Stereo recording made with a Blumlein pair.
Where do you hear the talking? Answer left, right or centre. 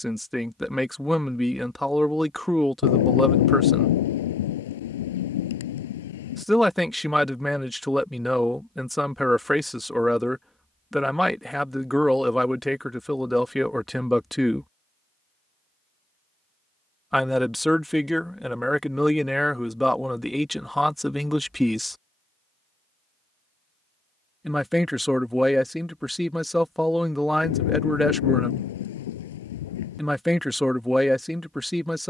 centre.